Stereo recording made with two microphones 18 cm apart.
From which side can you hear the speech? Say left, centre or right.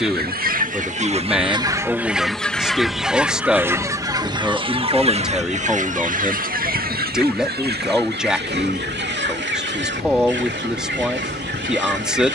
centre.